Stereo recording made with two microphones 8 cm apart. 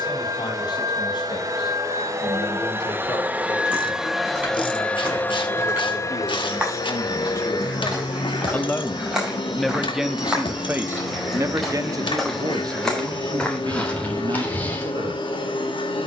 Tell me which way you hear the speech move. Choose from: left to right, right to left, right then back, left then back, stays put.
left to right.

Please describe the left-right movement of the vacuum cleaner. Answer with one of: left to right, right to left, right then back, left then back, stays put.
right to left.